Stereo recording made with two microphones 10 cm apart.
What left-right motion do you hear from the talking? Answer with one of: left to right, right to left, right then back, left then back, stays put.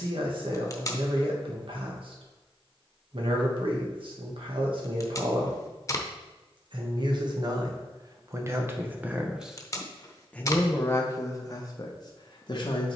right to left.